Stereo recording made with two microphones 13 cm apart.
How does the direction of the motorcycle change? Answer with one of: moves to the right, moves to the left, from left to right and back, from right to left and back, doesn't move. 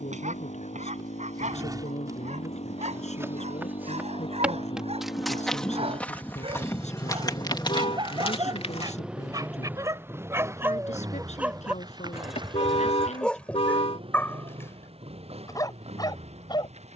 moves to the right.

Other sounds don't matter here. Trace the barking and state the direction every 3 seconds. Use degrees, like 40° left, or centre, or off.
60° right, 50° right, 40° right, 20° right, 10° left, 30° left.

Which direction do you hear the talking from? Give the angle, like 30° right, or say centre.
60° left.